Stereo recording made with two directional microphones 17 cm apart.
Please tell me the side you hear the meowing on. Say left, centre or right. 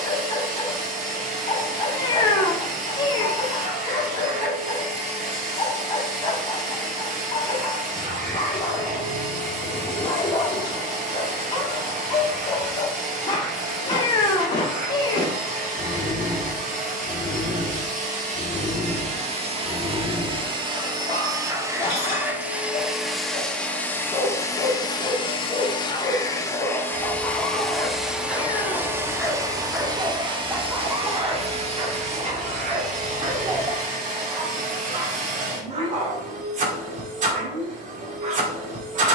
left.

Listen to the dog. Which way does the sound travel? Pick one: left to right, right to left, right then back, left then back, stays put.
left to right.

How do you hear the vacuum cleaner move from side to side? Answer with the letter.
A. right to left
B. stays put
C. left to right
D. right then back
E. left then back
E.